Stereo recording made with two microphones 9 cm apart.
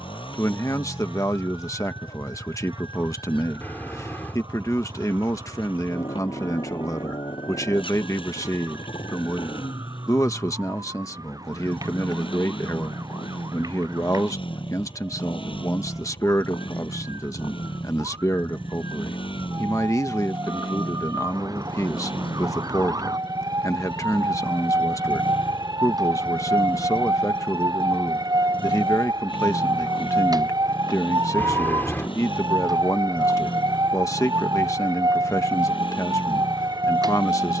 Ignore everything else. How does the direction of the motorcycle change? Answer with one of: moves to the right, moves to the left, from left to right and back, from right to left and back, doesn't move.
doesn't move.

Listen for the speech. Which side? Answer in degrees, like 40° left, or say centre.
40° left.